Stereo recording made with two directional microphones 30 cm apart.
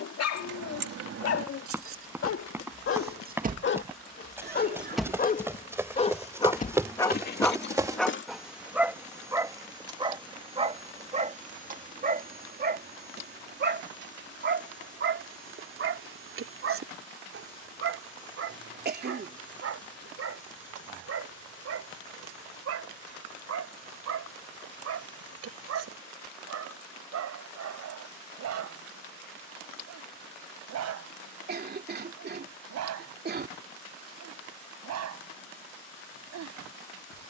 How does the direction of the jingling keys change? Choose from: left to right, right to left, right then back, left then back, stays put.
right to left.